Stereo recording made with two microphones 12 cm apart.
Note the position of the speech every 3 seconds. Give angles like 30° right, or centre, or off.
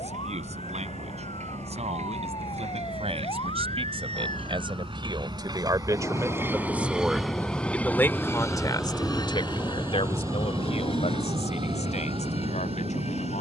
60° right, 40° right, 10° left, 60° left, 70° left.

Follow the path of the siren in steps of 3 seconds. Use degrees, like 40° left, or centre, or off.
50° left, 40° left, 10° left, 30° right, 50° right.